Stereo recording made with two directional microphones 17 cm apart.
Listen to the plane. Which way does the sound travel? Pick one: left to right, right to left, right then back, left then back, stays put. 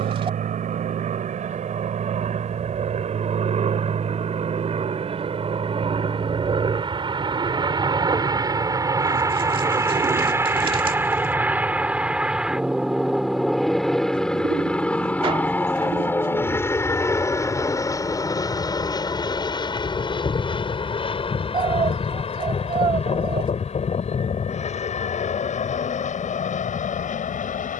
right to left.